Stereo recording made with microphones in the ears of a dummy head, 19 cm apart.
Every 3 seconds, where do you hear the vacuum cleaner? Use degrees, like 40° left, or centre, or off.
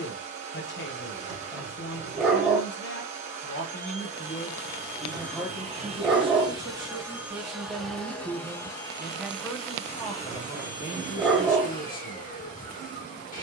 30° right, 30° right, centre, 30° left, 40° left.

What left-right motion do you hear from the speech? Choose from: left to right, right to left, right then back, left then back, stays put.
right then back.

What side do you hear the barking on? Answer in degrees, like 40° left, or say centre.
centre.